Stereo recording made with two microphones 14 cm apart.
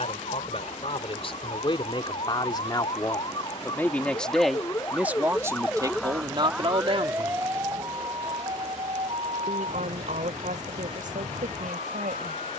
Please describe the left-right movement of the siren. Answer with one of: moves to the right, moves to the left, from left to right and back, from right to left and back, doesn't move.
moves to the right.